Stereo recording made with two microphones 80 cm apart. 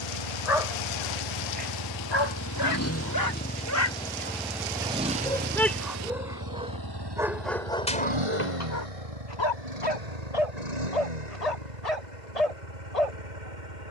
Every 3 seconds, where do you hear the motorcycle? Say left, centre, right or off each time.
left, centre, right, right, right.